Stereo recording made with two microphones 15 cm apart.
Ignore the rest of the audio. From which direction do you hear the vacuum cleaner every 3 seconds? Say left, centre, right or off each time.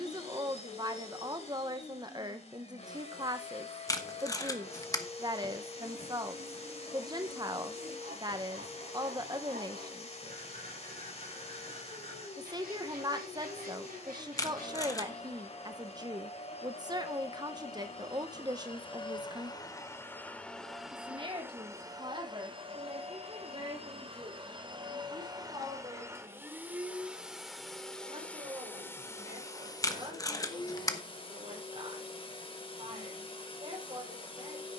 left, left, left, left, left, left, left, right, right, centre, left, left.